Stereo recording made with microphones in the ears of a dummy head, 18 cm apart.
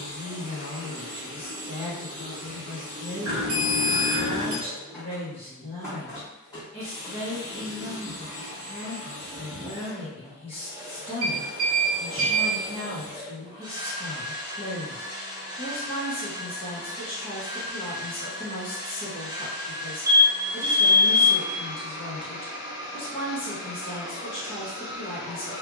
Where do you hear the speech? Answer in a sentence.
You can hear the speech on the left.